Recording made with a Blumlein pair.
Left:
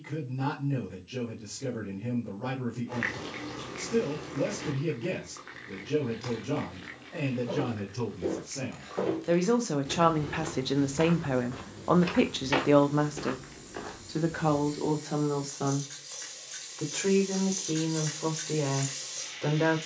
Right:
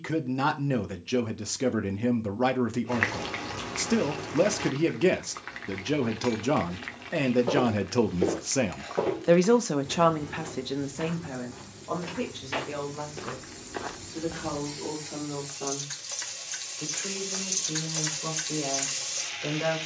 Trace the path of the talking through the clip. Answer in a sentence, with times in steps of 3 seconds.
In this clip you hear the talking on the right from 0 s, in the centre from 9 s and on the left from 12 s.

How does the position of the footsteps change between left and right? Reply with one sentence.
In this clip you hear the footsteps go left and come back.